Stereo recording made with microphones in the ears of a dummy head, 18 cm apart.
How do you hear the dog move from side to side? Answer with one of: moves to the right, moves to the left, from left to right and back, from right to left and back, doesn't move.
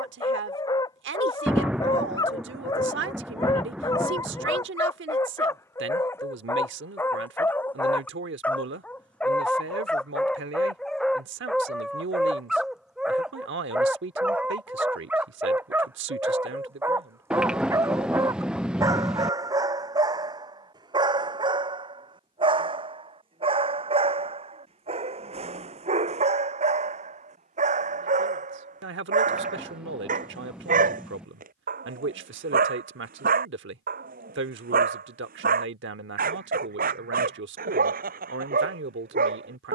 moves to the right.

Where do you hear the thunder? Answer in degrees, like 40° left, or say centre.
centre.